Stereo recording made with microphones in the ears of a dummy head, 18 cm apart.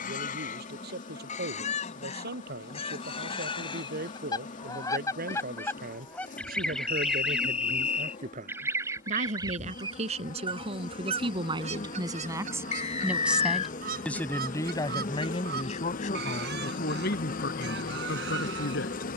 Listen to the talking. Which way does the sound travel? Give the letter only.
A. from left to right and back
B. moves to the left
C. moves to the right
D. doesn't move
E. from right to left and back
B.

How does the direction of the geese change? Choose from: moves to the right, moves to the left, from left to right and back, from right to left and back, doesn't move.
moves to the right.